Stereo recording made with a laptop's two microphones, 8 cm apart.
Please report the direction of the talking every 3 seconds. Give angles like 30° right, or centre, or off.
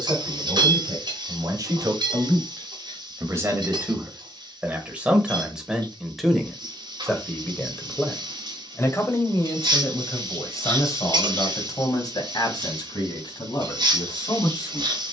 50° right, 20° right, 10° left, 40° left, 60° left.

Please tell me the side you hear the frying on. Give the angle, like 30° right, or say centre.
60° right.